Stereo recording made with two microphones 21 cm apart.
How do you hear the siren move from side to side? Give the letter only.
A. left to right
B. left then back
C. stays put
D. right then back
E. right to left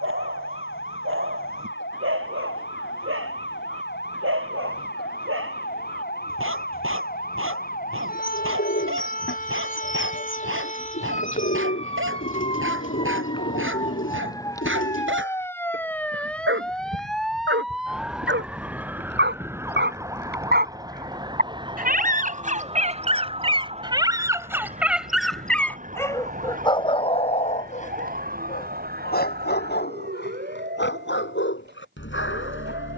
A.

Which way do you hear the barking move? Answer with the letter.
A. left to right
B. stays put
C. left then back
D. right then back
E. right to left
E.